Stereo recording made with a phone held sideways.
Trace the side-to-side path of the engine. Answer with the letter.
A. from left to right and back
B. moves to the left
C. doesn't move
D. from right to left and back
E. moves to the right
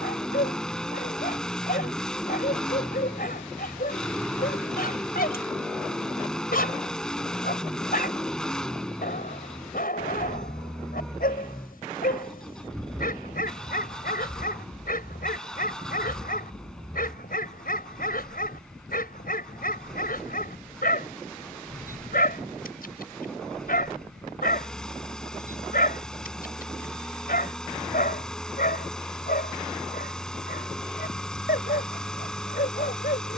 C.